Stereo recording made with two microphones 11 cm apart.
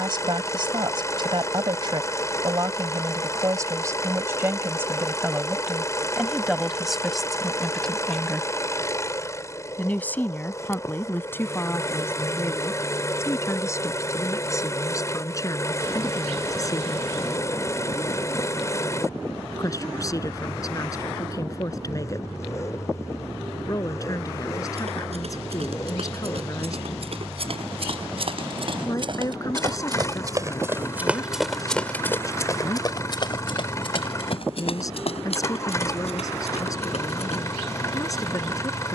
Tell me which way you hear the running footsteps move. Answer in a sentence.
In this clip you hear the running footsteps move from right to left.